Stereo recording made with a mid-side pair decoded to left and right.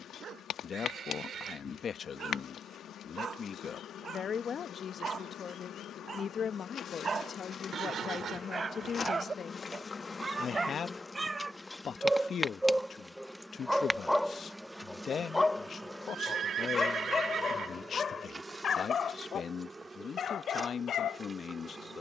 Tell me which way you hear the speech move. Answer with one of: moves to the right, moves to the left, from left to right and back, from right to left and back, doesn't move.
doesn't move.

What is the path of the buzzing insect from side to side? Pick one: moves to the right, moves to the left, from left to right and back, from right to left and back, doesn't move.
moves to the right.